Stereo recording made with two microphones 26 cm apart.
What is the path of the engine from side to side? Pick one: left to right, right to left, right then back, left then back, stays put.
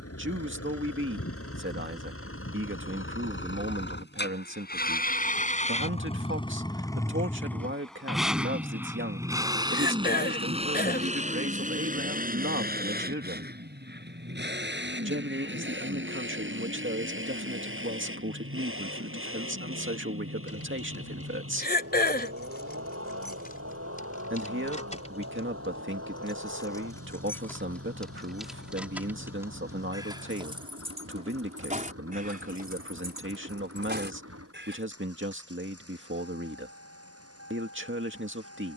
left to right.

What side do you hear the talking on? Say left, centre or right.
right.